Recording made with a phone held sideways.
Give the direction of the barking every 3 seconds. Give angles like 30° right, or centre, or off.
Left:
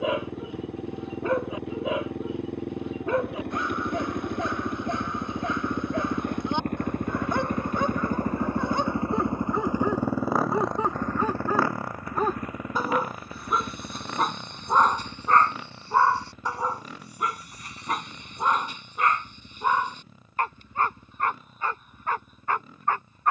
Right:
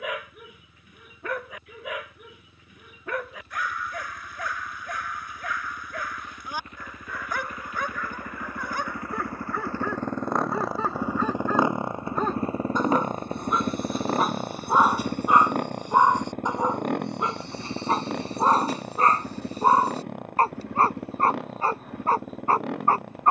30° left, 30° left, 30° left, 20° left, centre, 20° right, 40° right, 40° right.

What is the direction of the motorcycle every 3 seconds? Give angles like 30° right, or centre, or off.
80° left, 70° left, 50° left, centre, 40° right, 60° right, 70° right, 70° right.